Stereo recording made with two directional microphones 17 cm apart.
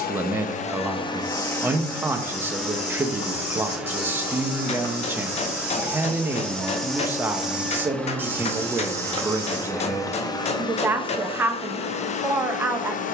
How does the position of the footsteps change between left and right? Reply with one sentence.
You can hear the footsteps move from left to right.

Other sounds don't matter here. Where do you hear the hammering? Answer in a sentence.
You can hear the hammering on the left.